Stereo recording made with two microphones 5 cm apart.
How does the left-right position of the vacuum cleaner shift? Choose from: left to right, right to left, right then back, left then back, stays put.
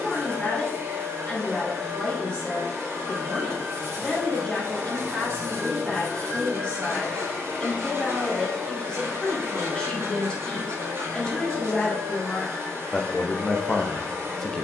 stays put.